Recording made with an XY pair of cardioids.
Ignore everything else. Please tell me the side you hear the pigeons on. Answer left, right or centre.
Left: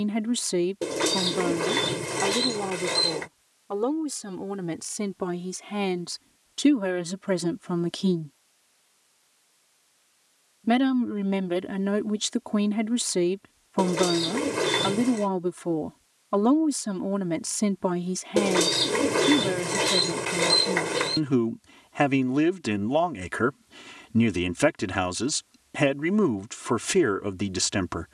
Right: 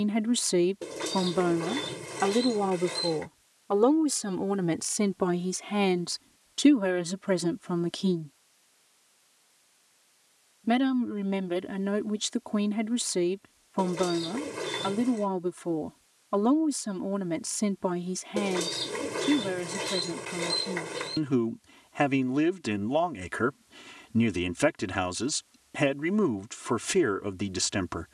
left.